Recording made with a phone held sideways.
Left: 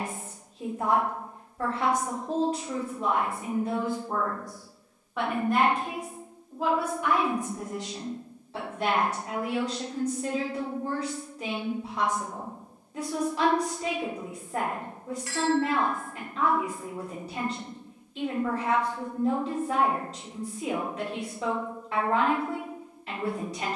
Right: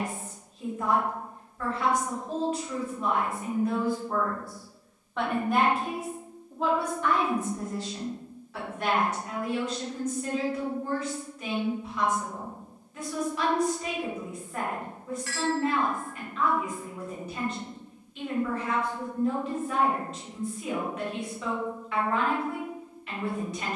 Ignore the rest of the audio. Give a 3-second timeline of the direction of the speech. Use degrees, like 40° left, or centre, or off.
40° left, 20° left, 20° left, 30° left, 40° left, 40° left, 40° left, 40° left.